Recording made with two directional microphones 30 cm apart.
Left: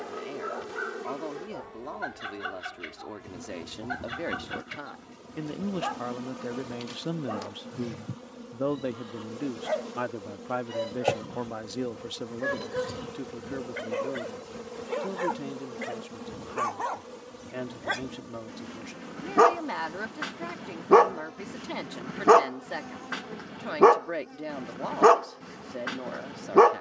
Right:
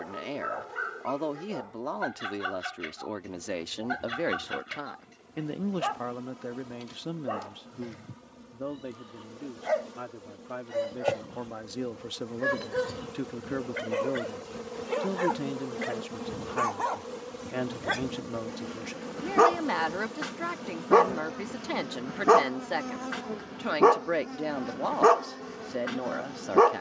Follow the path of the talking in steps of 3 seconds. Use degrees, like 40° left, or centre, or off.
40° right, 20° right, 20° left, 40° left, 20° right, 30° right, 30° right, 30° right, 30° right.